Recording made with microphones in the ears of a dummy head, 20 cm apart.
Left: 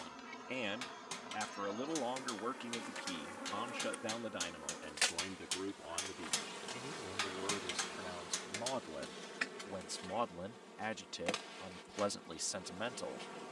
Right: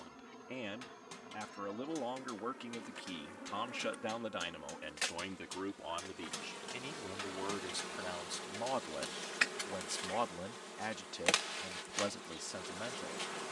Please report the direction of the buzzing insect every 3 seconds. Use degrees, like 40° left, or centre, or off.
30° left, 20° left, 10° right, 40° right, 50° right.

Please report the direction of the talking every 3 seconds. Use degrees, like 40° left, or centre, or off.
20° left, 30° right, 40° right, centre, 30° left.